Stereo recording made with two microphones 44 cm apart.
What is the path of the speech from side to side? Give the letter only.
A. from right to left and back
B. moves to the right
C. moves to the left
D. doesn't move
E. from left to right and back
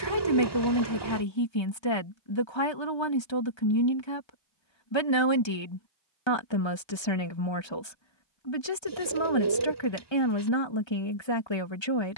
D.